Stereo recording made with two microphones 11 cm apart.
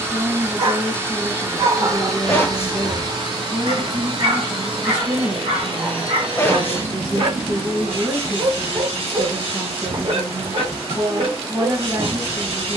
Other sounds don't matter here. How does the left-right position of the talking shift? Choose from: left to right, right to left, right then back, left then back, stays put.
stays put.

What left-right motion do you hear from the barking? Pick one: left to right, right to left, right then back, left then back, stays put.
stays put.